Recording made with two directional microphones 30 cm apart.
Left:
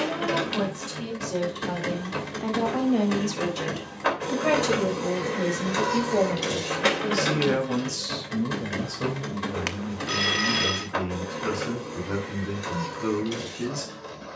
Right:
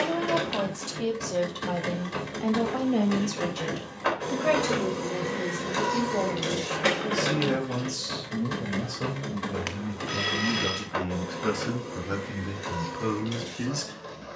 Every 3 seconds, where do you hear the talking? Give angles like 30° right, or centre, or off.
20° right, 20° left, 20° left, 10° right, 30° right.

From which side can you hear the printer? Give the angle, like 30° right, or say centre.
10° left.